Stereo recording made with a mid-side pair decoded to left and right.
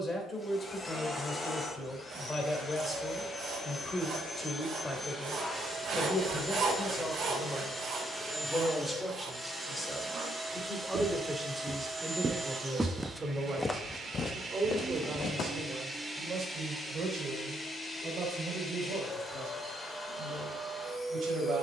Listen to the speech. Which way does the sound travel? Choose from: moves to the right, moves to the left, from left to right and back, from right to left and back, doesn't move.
moves to the right.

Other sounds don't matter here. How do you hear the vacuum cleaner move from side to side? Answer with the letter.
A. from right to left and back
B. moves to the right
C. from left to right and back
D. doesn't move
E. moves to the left
C.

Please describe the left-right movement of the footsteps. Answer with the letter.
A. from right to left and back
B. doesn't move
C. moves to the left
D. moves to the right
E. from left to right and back
C.